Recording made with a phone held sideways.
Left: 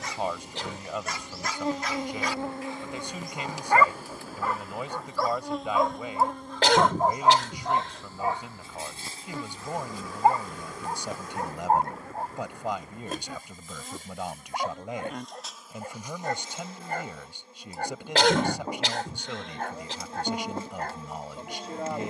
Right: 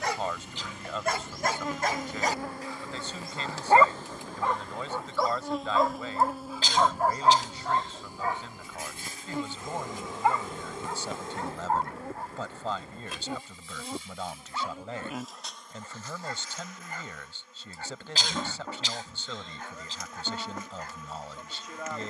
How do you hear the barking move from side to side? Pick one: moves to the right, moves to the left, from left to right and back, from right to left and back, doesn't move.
moves to the left.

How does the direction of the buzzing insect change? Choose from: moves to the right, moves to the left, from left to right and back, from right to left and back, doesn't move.
from left to right and back.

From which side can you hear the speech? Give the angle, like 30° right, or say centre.
10° left.